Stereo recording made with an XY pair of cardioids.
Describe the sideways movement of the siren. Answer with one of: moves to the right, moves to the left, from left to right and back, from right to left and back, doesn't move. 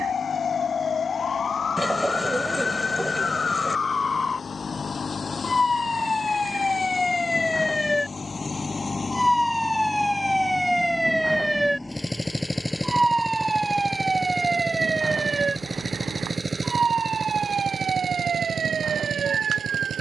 moves to the right.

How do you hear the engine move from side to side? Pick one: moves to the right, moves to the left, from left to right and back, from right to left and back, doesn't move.
moves to the right.